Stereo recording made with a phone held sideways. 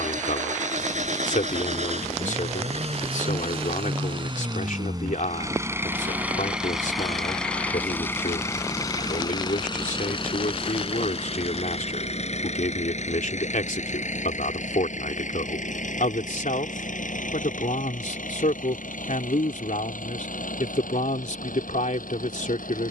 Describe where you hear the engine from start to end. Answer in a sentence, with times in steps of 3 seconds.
In this clip you hear the engine on the right from 0 s, in the centre from 6 s and on the left from 9 s.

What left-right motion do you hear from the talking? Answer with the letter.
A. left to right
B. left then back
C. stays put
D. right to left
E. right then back
C.